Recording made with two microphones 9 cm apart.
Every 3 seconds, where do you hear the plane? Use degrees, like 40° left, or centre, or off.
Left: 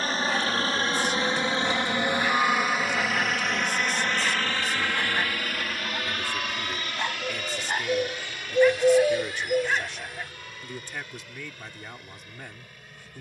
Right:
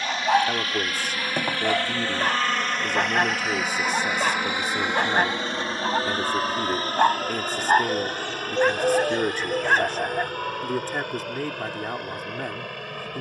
20° left, 10° right, 40° right, 50° right, 60° right.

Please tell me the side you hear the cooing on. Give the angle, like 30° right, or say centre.
10° left.